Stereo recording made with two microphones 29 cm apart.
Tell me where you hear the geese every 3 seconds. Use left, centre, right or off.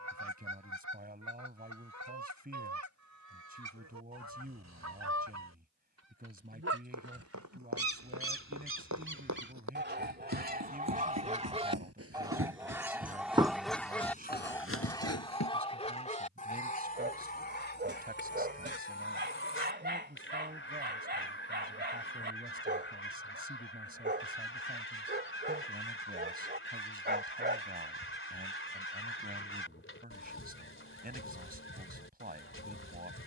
right, right, right, right, centre, left, left, left, left, left, left.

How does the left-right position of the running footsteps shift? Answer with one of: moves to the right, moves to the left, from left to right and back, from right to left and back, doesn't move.
moves to the left.